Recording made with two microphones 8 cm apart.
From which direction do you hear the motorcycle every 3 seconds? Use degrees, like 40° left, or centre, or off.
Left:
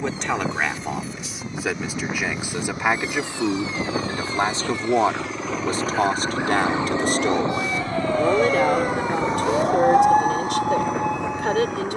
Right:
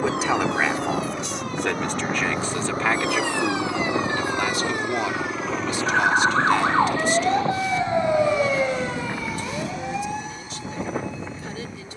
50° right, 20° right, 30° left, 60° left.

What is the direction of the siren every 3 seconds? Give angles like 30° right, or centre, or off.
70° right, 60° right, 30° right, 50° left.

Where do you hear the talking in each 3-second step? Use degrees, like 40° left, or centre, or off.
centre, 30° left, 50° left, 70° left.